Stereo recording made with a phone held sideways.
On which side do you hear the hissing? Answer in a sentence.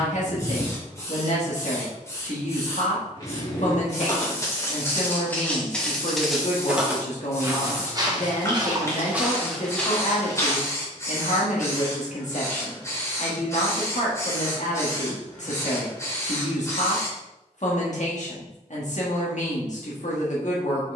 In this clip you hear the hissing on the left.